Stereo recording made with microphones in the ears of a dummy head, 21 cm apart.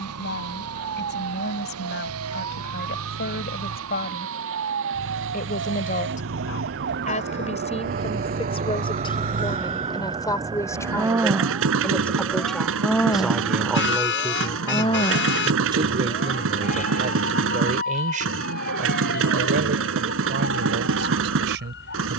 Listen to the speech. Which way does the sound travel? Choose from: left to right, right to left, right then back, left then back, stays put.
left to right.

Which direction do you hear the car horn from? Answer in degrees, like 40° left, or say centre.
50° left.